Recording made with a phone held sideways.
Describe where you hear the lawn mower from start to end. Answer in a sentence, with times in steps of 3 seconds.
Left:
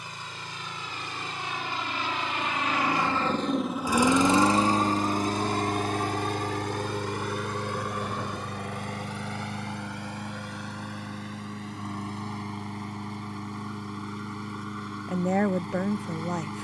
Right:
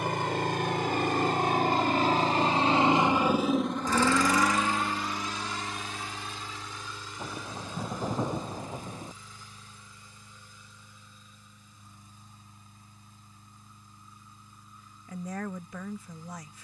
You can hear the lawn mower on the right from 0 s and on the left from 3 s.